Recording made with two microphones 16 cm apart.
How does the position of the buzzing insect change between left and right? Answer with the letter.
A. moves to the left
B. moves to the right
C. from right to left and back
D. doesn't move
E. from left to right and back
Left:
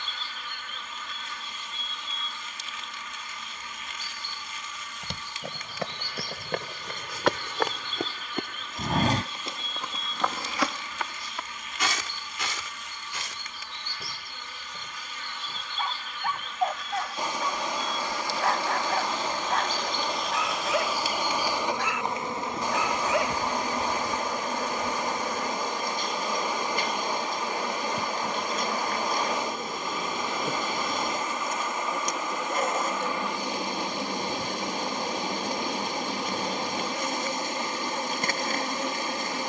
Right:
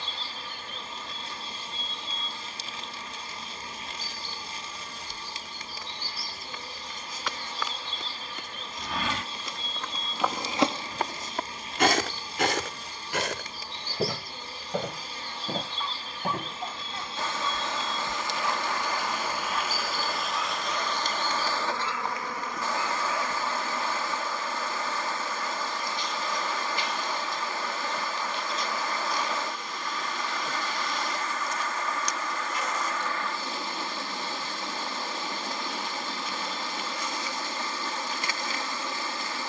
A.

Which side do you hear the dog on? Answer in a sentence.
In this clip you hear the dog on the left.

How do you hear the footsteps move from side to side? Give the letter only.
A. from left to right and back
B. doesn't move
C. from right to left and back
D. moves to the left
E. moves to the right
E.